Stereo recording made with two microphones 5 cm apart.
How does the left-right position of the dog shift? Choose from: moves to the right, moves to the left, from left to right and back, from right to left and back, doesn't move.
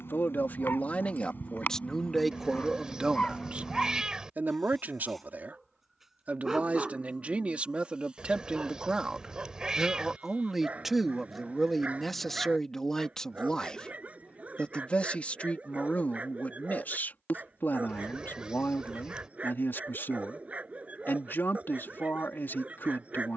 moves to the right.